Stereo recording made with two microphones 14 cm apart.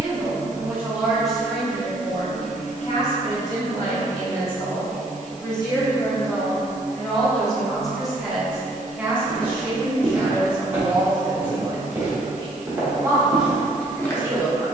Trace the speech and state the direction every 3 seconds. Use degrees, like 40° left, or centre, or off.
centre, 40° left, 10° left, 20° right, 30° right.